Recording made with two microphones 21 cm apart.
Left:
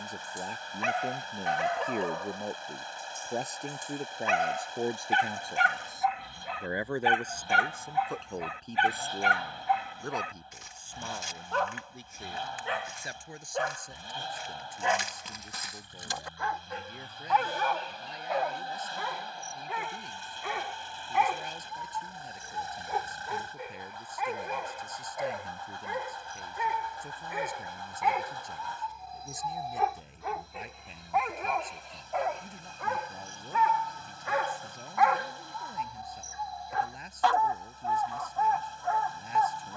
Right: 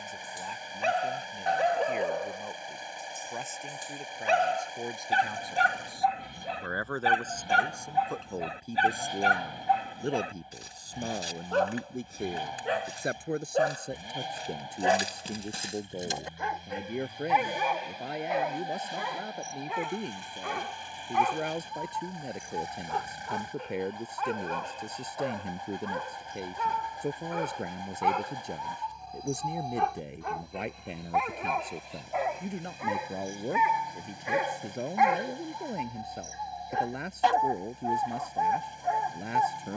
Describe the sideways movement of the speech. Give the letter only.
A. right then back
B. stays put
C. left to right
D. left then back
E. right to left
C.